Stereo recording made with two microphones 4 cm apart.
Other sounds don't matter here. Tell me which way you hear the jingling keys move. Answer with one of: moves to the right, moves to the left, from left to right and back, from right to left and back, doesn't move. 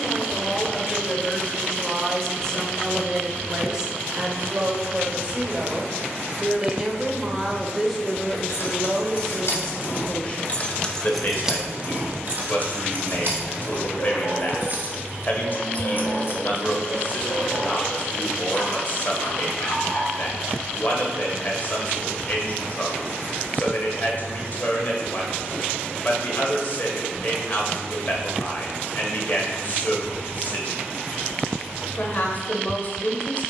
from left to right and back.